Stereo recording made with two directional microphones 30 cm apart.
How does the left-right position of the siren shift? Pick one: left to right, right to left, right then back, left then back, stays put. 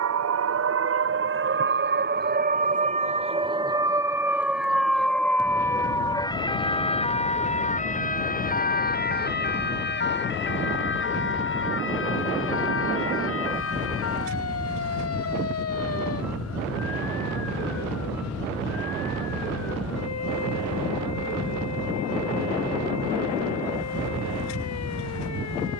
right to left.